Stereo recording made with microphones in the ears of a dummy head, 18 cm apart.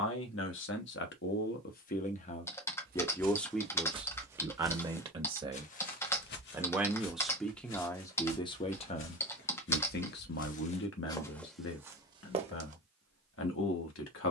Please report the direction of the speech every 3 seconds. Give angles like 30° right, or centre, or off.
50° left, 10° right, 10° left, 60° left, 70° left.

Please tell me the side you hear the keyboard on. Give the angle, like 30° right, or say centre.
10° left.